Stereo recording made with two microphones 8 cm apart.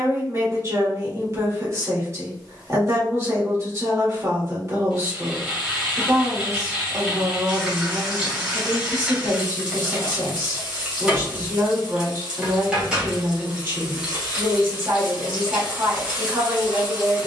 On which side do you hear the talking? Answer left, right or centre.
right.